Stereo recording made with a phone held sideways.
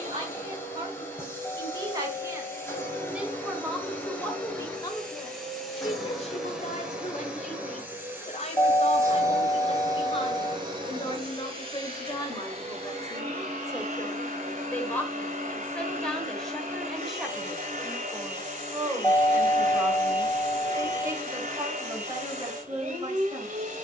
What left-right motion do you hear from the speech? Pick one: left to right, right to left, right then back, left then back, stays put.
left then back.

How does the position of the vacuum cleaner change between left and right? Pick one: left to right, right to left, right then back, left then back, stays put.
left to right.